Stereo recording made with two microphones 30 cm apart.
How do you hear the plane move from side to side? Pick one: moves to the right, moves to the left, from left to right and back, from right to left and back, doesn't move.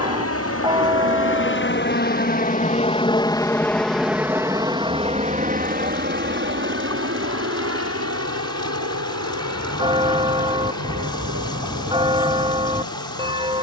moves to the right.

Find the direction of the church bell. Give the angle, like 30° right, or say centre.
20° right.